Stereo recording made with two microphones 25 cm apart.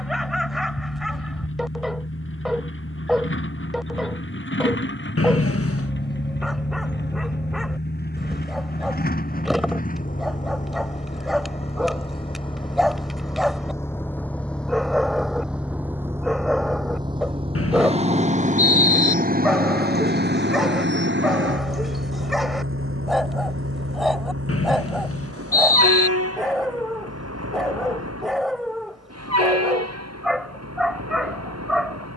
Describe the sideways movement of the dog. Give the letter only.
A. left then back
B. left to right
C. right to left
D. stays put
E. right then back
D.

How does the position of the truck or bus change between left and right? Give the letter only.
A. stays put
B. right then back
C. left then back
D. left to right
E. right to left
D.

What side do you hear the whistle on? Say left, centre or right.
left.